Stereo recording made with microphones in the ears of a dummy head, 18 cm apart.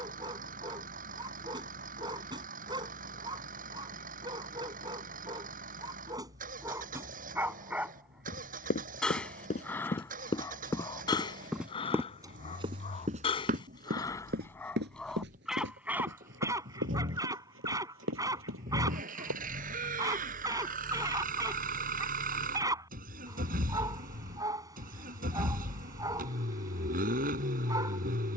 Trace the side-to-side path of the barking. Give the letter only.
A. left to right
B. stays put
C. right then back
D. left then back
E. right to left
D.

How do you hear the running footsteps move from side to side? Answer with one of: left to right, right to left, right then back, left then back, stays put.
left to right.